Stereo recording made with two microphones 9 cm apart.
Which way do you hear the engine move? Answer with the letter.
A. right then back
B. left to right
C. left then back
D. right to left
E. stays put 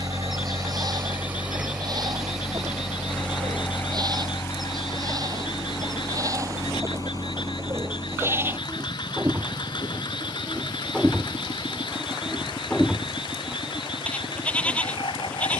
D.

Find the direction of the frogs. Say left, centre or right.
left.